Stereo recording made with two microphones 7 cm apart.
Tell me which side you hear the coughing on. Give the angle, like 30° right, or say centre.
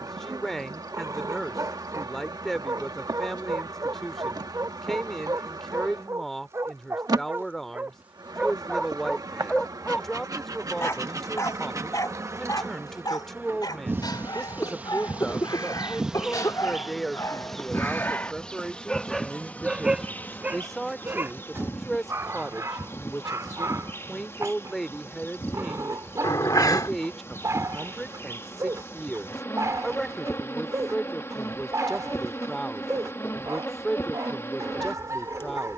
60° left.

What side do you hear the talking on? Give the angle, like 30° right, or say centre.
centre.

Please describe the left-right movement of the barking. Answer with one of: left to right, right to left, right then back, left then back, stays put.
left then back.